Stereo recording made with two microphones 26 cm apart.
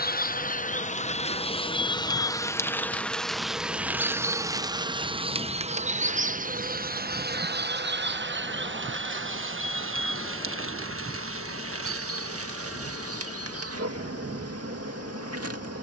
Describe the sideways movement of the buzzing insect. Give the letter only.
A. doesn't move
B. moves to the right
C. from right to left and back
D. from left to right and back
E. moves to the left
B.